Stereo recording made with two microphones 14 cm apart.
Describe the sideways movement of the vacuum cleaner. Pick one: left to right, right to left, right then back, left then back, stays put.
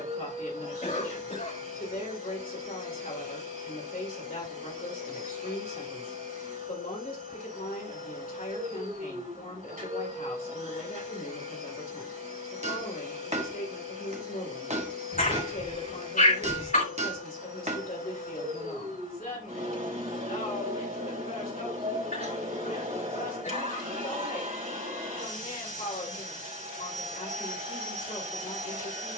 stays put.